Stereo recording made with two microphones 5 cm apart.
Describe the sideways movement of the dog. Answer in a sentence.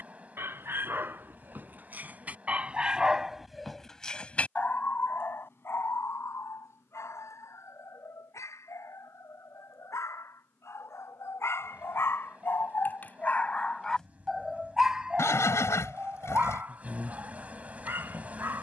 You can hear the dog go left and come back.